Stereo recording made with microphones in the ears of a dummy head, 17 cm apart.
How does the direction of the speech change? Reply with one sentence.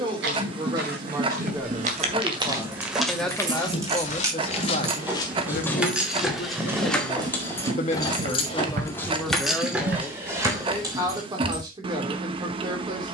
You can hear the speech move from right to left and back again.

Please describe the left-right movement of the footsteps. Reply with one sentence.
In this clip you hear the footsteps move from right to left and back again.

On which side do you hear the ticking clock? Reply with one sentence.
In this clip you hear the ticking clock on the right.